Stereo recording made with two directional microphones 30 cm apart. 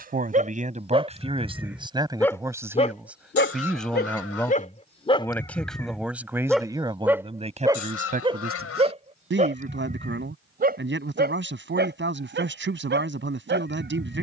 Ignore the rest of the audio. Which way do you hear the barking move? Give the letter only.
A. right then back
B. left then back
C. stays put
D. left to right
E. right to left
B.